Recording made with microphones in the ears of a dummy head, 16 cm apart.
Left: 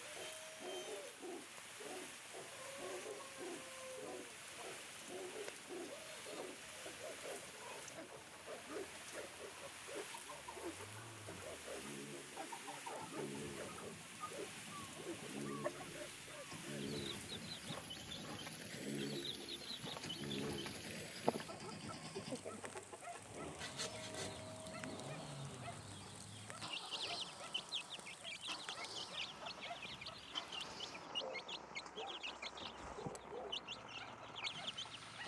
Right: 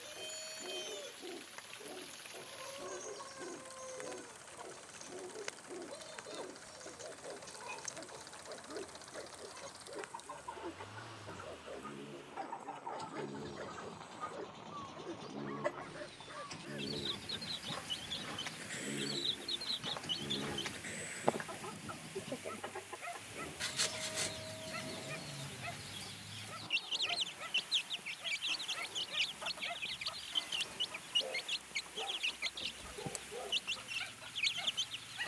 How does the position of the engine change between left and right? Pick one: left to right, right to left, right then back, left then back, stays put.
right to left.